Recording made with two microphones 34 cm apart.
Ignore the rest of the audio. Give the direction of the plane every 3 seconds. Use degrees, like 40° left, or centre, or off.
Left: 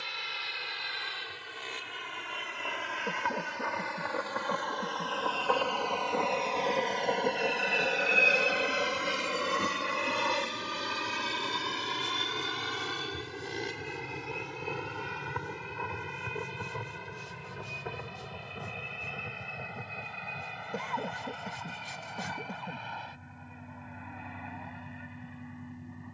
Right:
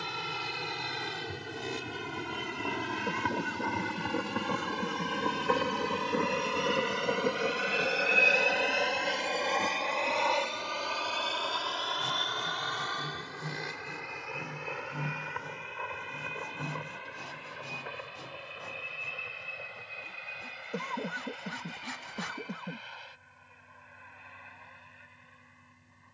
60° right, 40° right, 10° right, 20° left, 40° left, 50° left, 50° left, 60° left, 60° left.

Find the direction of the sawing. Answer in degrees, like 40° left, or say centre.
80° right.